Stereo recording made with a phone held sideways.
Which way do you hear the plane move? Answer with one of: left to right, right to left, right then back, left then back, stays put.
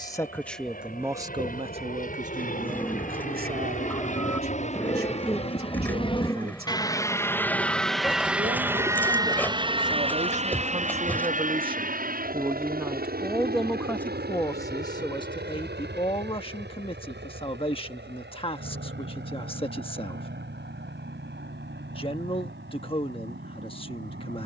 left to right.